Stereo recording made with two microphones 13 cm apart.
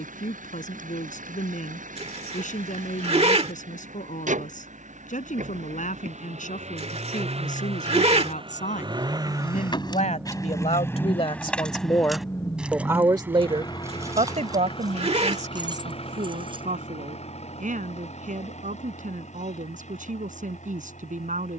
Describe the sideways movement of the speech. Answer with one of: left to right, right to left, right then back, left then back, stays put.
left to right.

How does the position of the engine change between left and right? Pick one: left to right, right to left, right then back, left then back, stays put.
right to left.